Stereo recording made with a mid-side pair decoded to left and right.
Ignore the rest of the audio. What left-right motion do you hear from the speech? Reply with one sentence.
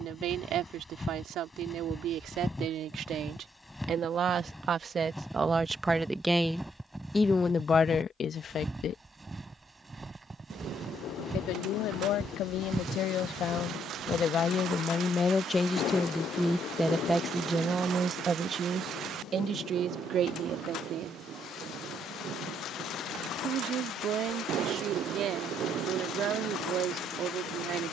In this clip you hear the speech go left and come back.